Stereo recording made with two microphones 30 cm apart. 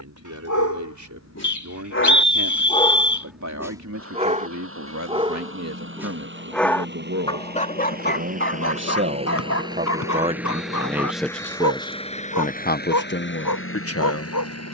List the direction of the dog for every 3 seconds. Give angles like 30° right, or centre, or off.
50° left, 10° right, 30° left, 70° left, 80° left.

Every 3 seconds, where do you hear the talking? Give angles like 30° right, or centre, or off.
70° right, 60° right, 50° right, 10° right, 40° left.